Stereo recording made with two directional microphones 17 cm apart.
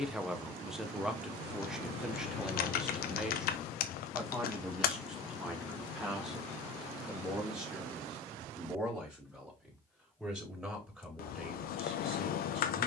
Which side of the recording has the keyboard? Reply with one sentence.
You can hear the keyboard on the left.